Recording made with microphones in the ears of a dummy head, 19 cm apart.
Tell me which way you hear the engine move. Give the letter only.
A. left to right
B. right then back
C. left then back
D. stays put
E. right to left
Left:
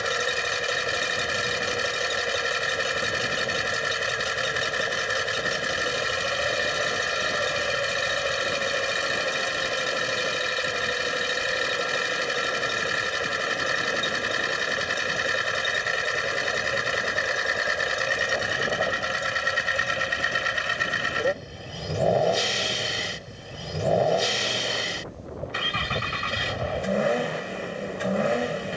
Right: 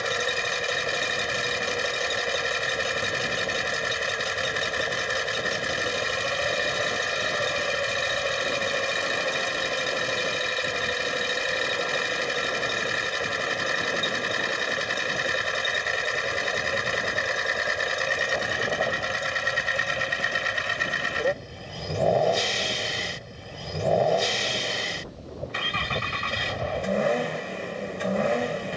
D.